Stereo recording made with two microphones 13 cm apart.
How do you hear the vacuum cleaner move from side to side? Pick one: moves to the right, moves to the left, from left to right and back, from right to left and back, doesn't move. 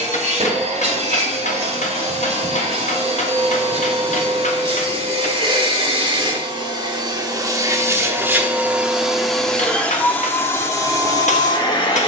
moves to the left.